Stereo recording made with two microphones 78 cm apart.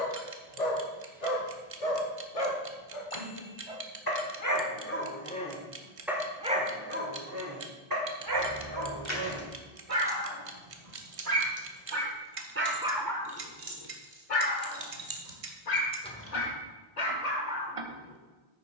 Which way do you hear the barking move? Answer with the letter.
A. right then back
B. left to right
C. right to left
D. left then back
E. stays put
A.